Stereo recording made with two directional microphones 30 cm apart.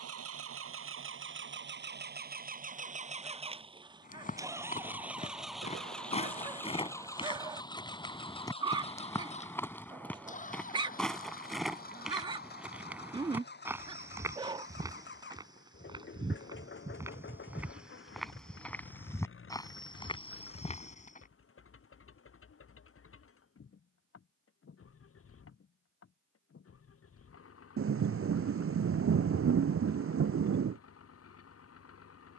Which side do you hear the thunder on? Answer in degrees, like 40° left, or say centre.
50° right.